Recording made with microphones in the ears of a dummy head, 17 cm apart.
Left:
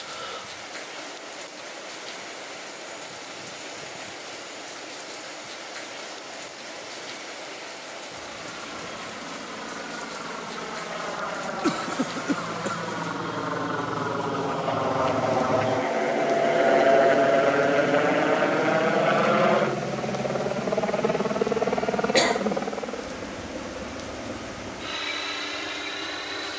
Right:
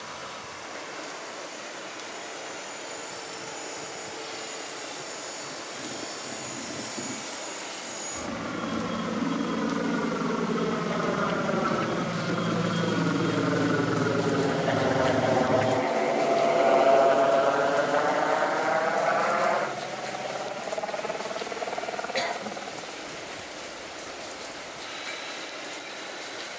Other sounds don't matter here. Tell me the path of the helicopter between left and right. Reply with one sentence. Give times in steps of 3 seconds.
You can hear the helicopter on the right from 0 s, in the centre from 15 s and on the left from 18 s.